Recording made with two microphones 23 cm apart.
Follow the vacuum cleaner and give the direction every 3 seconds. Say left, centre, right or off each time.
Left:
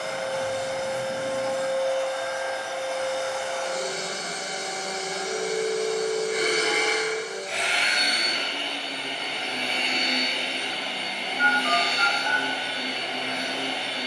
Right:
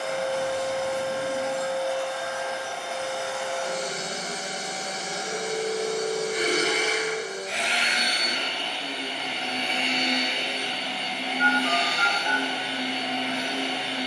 left, right, centre, left, left.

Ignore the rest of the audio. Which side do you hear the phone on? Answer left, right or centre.
left.